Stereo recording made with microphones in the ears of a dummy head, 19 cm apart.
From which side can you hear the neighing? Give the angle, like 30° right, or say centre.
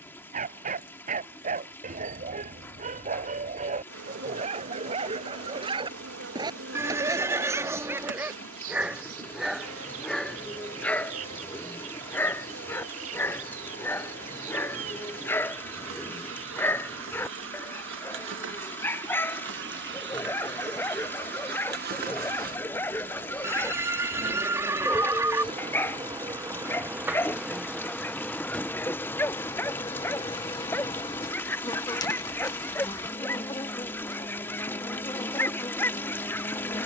10° right.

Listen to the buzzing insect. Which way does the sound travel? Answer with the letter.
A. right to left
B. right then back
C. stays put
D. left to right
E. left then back
A.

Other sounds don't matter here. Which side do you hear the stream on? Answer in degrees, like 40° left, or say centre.
10° left.